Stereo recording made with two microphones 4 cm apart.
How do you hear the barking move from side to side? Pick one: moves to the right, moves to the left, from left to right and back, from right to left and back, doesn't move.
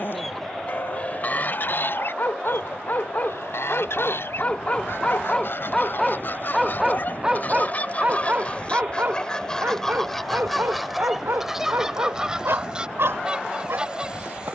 moves to the right.